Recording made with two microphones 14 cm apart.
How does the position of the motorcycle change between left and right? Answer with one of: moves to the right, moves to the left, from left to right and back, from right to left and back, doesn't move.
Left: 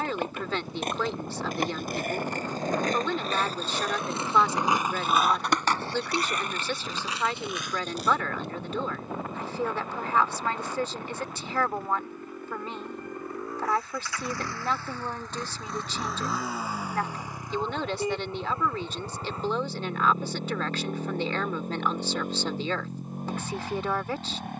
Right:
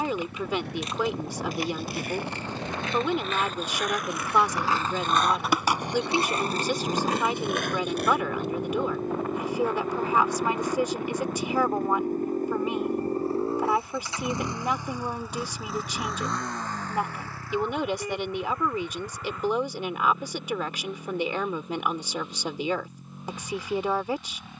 moves to the left.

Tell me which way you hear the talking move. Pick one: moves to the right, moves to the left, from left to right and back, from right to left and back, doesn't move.
doesn't move.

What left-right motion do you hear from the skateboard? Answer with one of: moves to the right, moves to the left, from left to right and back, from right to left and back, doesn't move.
moves to the right.